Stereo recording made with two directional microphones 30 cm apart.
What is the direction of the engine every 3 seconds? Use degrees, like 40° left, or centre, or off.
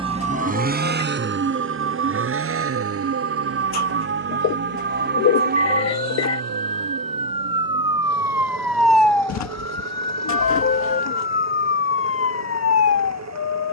40° right, 50° right, 50° right, 60° right, 60° right.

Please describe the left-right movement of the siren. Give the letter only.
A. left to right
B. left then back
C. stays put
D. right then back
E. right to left
E.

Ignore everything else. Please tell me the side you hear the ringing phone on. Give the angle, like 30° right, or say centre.
40° left.